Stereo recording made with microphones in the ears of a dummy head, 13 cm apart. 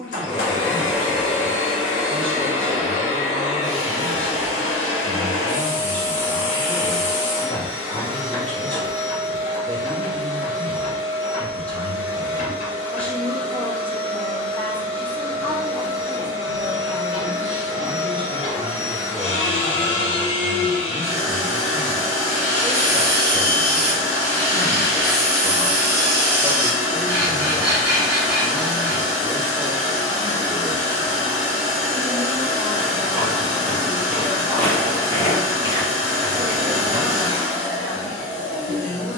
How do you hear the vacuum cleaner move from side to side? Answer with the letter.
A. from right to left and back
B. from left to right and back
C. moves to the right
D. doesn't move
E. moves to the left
D.